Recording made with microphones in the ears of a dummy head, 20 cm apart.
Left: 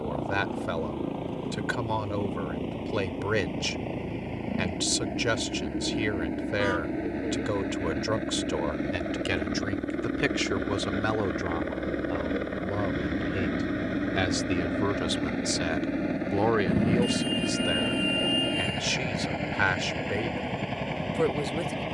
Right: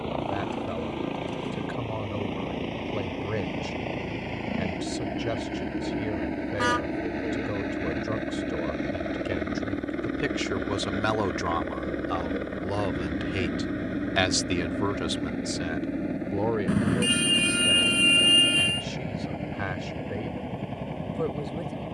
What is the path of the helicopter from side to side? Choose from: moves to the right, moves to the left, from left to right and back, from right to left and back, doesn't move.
moves to the left.